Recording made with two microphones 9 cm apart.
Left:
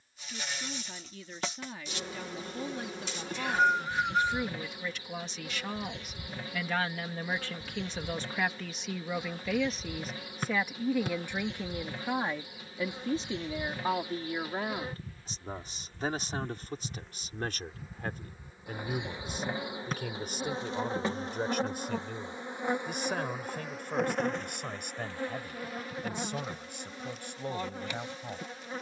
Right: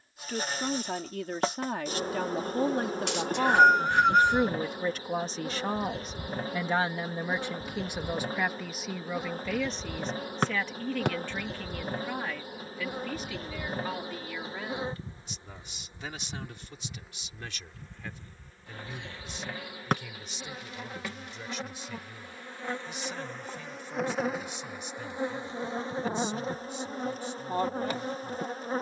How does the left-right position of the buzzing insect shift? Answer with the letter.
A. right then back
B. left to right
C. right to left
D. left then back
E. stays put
D.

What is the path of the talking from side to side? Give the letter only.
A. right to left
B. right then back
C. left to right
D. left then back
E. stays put
A.